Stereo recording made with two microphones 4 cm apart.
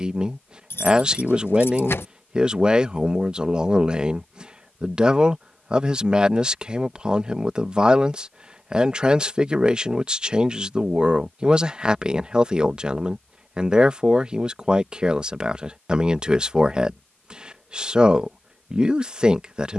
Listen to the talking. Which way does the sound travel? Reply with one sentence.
You can hear the talking stay in one place.